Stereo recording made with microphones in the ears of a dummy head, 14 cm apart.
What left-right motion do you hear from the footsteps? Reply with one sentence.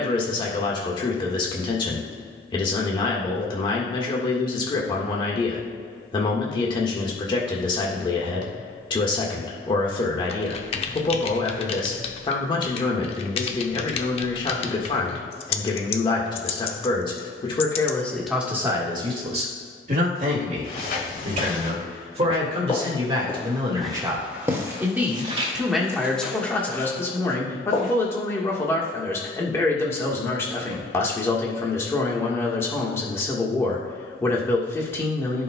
In this clip you hear the footsteps go right and come back.